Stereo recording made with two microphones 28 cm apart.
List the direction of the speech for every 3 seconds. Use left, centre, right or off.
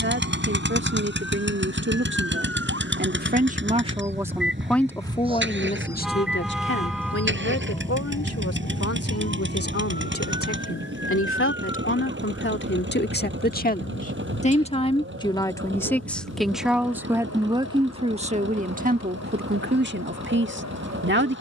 right, centre, left, left, left, centre, right.